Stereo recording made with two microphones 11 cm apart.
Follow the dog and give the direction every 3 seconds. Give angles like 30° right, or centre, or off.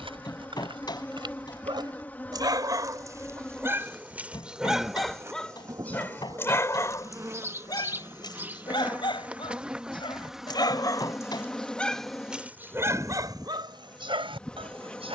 50° right, 10° right, 40° left, 40° left, 40° right.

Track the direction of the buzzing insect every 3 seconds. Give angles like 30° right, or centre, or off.
20° left, 10° right, 20° right, centre, 10° left.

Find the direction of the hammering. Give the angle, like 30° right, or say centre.
40° left.